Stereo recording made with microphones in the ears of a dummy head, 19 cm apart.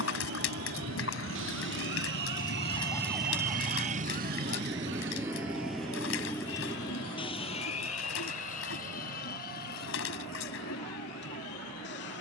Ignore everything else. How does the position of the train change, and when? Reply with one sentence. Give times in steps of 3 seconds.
You can hear the train on the right from 0 s and on the left from 6 s.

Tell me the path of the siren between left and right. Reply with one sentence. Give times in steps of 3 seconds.
In this clip you hear the siren on the left from 0 s and on the right from 3 s.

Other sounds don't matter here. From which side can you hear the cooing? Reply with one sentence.
In this clip you hear the cooing on the left.